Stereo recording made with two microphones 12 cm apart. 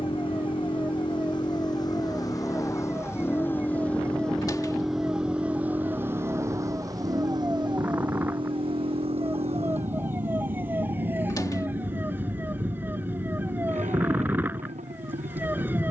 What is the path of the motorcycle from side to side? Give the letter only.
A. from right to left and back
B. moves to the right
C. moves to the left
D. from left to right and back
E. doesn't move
B.